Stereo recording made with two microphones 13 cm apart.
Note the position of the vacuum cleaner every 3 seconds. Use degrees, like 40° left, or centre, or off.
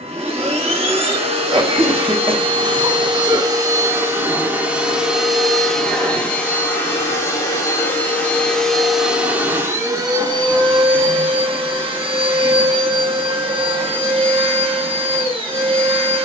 40° right, 10° right, 10° left, 30° right, 40° right, 40° right.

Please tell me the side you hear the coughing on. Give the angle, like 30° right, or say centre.
30° right.